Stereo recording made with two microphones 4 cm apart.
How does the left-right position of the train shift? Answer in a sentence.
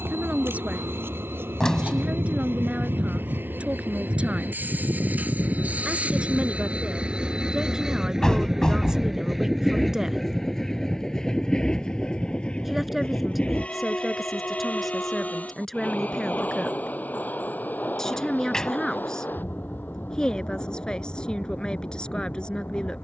You can hear the train travel towards the left.